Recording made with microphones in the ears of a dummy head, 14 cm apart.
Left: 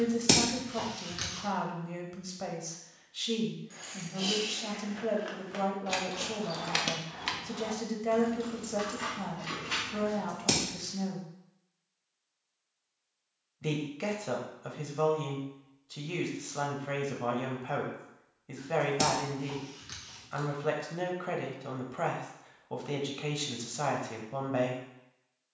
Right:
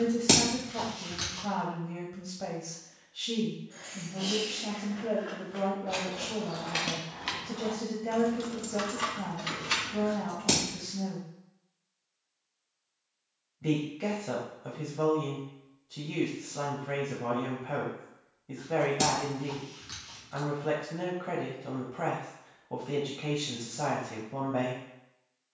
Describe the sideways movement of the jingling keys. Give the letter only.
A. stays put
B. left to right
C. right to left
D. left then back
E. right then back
B.